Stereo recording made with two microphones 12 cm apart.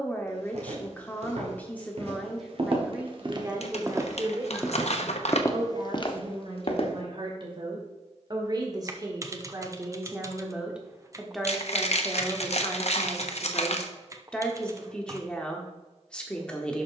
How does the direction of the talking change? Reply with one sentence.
In this clip you hear the talking move from left to right and back again.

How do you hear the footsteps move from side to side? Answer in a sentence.
In this clip you hear the footsteps go from the right side to the left.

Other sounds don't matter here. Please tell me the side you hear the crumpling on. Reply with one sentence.
In this clip you hear the crumpling on the left.